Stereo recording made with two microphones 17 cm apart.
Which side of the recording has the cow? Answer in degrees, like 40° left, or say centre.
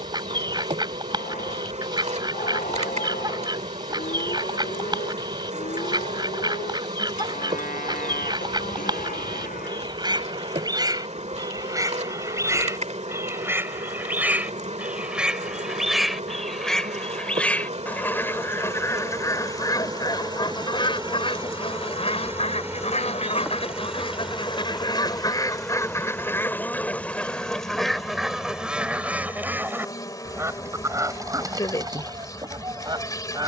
50° left.